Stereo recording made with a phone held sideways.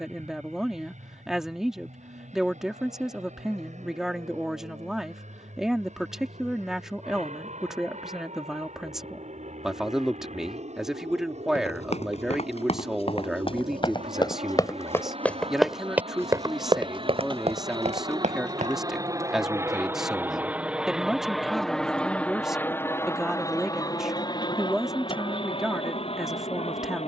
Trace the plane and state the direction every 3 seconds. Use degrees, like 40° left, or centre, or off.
80° right, 70° right, 70° right, 70° right, 60° right, 50° right, 20° right, 10° left, 40° left.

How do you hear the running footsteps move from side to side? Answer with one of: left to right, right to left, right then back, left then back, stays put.
left to right.